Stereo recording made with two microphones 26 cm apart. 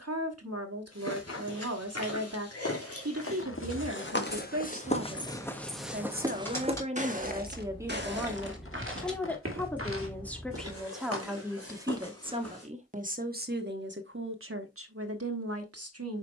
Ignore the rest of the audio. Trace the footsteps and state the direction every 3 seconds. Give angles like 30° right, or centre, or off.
70° left, 30° left, 30° right, 60° right, 60° right, off.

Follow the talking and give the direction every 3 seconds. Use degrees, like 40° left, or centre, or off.
70° right, 60° right, 20° right, centre, 40° right, 70° right.